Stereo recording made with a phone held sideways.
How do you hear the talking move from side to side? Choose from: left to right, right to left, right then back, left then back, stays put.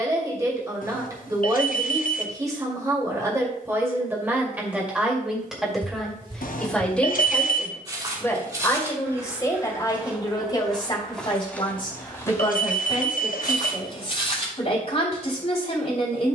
right to left.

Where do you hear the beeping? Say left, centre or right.
left.